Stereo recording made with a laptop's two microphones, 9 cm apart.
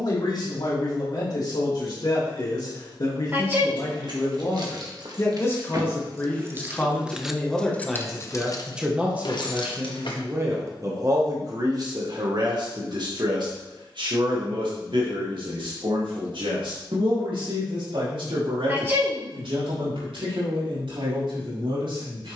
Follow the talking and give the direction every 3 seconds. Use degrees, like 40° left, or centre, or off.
50° left, 40° left, 10° left, 30° right, 60° right, 70° right, 80° right, 80° right.